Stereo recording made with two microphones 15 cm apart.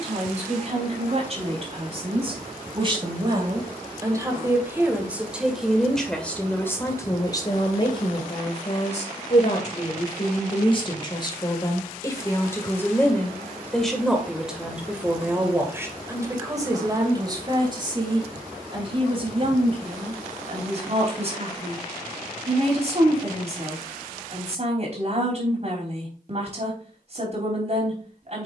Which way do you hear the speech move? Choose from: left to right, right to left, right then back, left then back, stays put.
left then back.